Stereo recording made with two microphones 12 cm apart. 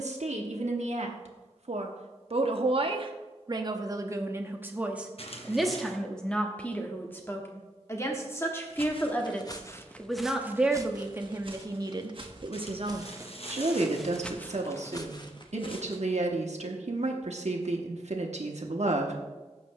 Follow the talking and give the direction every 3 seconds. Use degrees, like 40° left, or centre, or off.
70° right, 20° right, 20° left, 10° right, 60° right, 70° right, 70° right.